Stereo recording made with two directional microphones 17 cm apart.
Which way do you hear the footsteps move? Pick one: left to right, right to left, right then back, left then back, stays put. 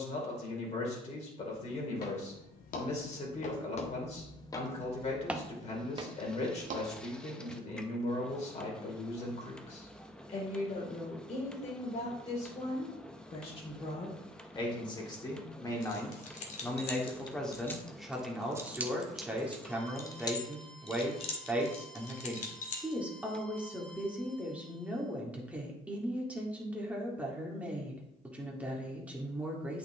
left to right.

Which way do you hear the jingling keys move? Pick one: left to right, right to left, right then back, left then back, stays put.
right then back.